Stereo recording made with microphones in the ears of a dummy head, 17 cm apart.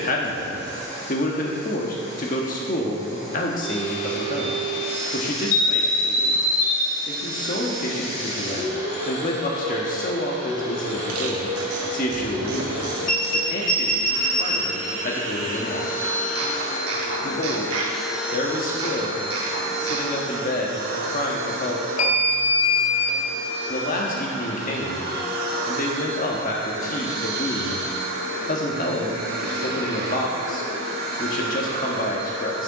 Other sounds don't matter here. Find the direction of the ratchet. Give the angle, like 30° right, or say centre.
80° right.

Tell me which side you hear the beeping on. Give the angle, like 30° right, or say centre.
40° left.